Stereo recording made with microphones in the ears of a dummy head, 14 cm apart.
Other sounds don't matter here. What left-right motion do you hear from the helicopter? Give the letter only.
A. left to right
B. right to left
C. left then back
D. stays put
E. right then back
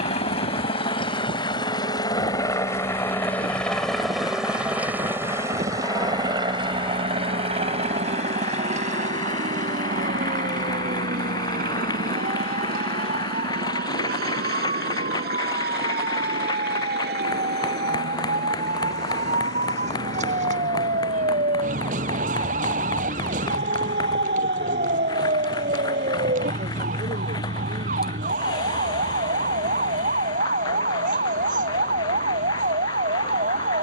A.